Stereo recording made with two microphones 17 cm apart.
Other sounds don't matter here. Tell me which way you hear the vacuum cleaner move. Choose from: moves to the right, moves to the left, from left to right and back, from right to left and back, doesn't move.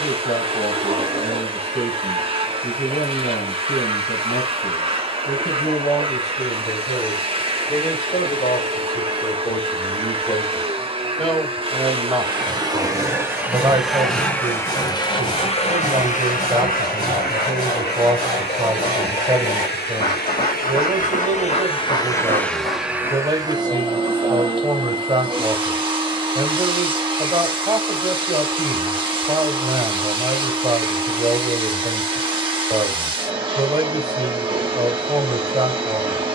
from right to left and back.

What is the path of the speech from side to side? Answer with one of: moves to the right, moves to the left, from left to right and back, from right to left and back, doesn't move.
moves to the right.